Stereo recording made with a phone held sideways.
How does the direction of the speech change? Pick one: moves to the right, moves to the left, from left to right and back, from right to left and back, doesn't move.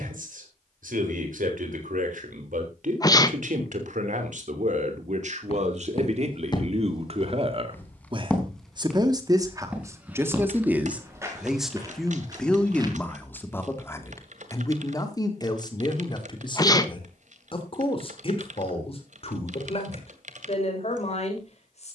moves to the left.